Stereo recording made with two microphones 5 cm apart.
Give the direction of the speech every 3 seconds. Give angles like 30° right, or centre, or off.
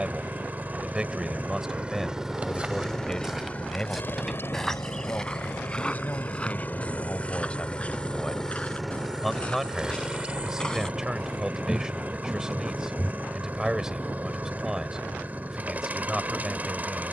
10° right, 30° left, 20° left, 10° right, 10° right, 10° right.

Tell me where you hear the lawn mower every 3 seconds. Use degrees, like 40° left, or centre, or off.
20° right, 40° left, 20° left, 20° right, 30° right, 30° right.